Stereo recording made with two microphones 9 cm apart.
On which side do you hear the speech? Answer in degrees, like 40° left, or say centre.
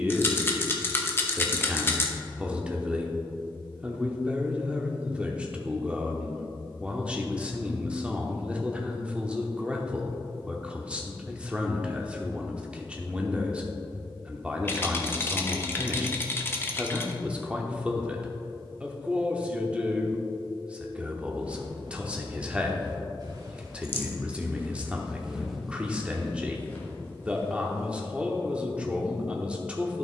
10° right.